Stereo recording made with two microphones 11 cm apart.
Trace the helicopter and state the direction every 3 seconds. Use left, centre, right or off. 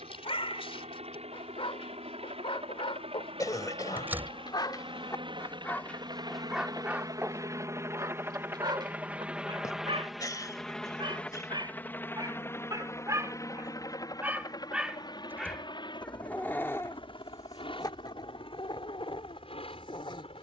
right, right, right, centre, left, left, left.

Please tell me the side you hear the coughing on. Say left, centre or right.
left.